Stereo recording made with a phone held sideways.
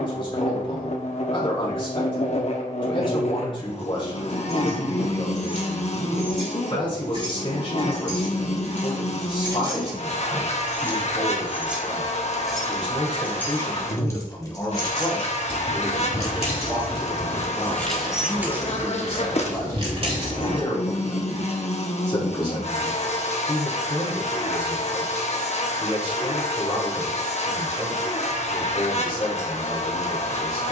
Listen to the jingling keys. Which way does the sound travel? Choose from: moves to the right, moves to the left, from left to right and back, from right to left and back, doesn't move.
from right to left and back.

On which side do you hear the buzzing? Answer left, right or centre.
left.